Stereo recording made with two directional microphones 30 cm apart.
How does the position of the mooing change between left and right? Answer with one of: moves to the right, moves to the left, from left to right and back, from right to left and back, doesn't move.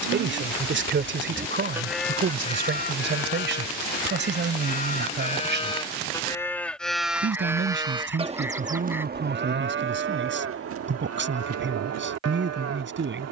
from right to left and back.